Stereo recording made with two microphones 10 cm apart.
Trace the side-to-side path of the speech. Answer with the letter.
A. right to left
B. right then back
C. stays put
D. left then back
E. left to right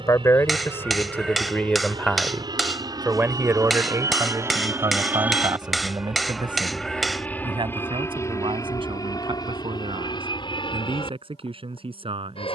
E.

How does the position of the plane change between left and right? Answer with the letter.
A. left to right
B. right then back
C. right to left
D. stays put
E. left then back
C.